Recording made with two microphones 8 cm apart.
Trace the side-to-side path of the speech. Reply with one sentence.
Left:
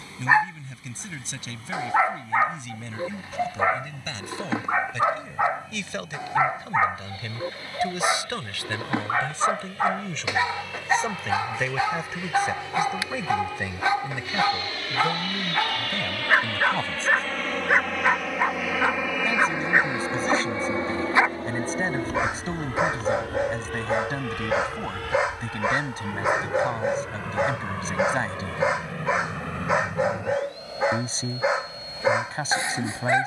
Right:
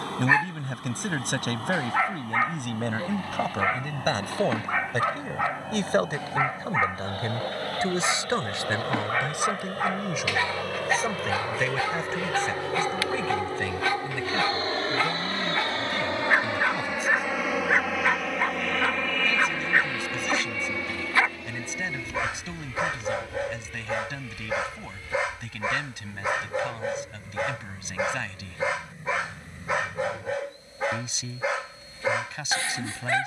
You can hear the speech move from right to left.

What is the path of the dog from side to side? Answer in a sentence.
You can hear the dog stay in one place.